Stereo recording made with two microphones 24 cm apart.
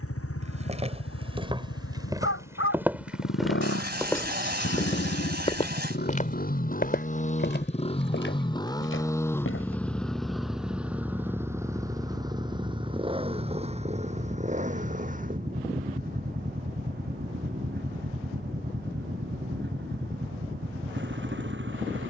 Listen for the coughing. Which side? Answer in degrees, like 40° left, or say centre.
40° right.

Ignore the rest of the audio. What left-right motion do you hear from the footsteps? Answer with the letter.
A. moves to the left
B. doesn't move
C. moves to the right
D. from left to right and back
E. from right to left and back
A.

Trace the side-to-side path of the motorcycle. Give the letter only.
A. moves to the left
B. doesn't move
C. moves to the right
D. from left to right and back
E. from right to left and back
C.